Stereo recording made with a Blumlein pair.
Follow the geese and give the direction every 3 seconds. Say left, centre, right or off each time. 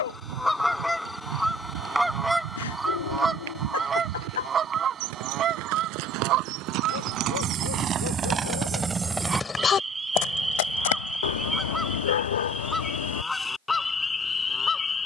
centre, right, right, centre, centre.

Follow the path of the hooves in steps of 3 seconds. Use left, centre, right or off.
right, right, right, left, off.